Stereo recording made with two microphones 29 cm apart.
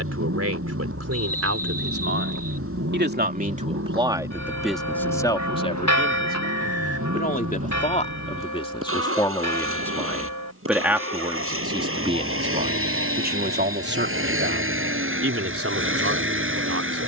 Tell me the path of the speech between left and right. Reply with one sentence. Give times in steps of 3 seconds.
You can hear the speech on the right from 0 s, in the centre from 3 s, on the left from 6 s, in the centre from 9 s and on the right from 12 s.